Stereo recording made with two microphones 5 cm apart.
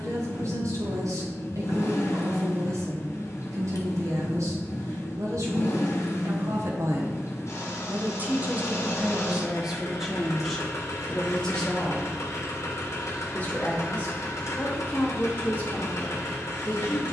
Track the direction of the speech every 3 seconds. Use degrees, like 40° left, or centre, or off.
80° right, 70° right, 50° right, centre, 30° left, 30° left.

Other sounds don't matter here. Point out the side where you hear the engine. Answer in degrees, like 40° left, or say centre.
60° left.